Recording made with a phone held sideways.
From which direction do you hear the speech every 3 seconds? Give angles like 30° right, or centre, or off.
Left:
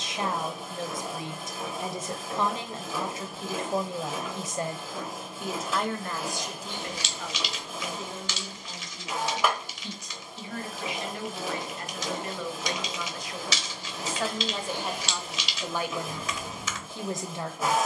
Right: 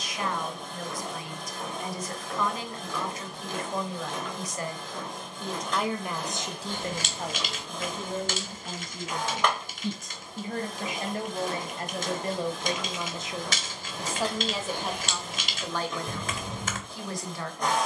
30° left, 20° left, 40° right, 50° right, 20° right, 20° left.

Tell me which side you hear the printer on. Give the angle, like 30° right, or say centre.
10° left.